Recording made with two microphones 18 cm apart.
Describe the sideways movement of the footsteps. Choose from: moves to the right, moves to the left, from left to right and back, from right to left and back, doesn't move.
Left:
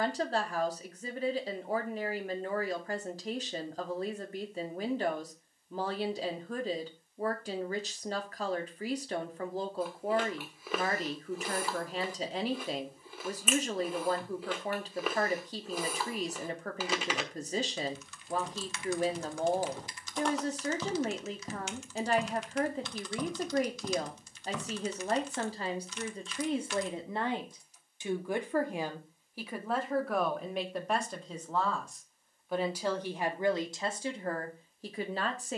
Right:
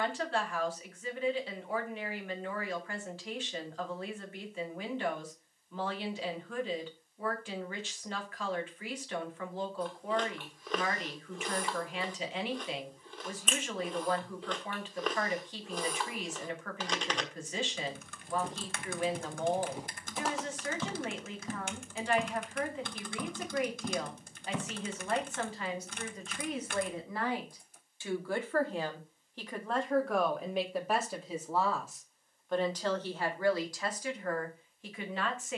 from right to left and back.